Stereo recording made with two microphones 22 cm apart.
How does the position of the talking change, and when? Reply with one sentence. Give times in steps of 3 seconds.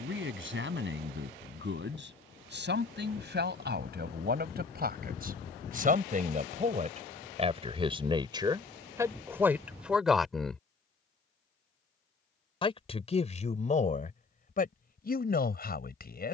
In this clip you hear the talking on the right from 0 s, in the centre from 9 s and on the left from 12 s.